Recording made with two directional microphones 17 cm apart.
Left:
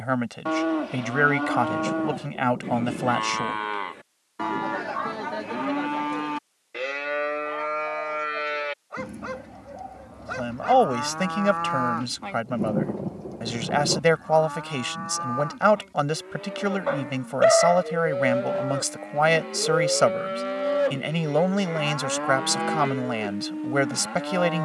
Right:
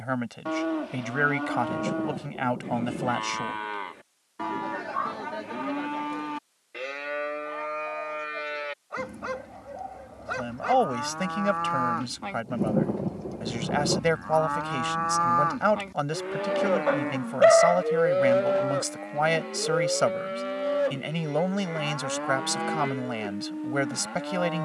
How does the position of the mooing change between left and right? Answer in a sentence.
In this clip you hear the mooing go right and come back.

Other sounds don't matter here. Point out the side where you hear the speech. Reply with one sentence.
You can hear the speech on the left.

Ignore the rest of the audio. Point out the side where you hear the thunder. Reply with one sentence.
You can hear the thunder in the centre.